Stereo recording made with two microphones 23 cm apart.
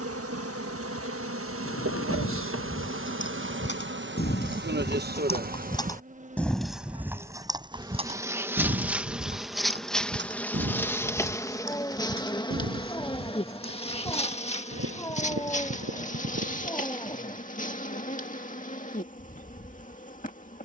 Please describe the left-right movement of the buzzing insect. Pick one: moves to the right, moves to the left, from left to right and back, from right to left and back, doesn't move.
moves to the left.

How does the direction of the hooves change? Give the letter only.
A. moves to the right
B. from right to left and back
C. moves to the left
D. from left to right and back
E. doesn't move
A.